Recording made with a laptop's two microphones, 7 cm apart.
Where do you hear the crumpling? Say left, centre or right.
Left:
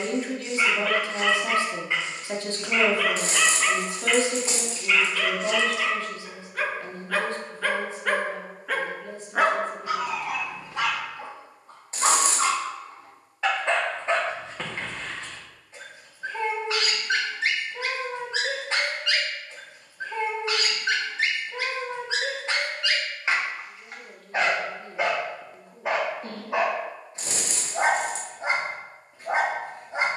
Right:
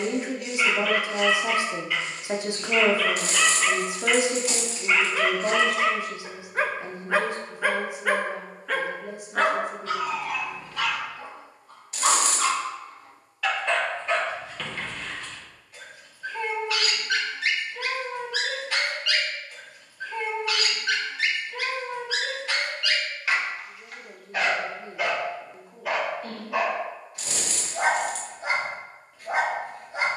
left.